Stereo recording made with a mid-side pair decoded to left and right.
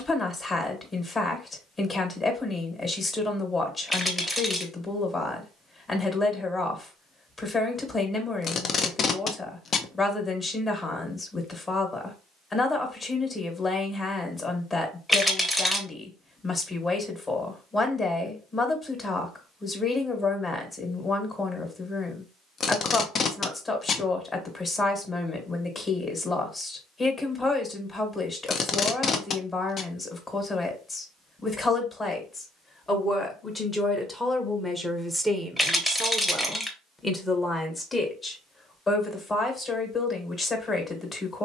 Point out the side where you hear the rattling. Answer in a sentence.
In this clip you hear the rattling in the centre.